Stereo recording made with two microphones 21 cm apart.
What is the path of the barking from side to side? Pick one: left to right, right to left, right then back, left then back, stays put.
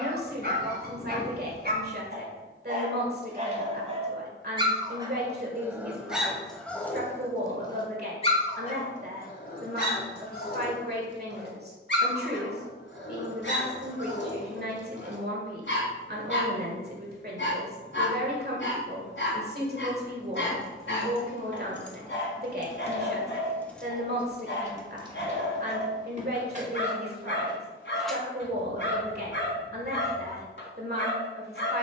right to left.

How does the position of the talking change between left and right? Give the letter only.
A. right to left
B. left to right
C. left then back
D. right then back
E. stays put
E.